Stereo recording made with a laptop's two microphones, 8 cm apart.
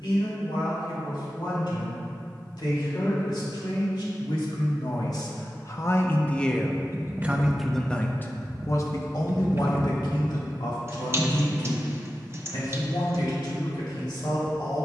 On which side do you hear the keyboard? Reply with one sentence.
You can hear the keyboard on the right.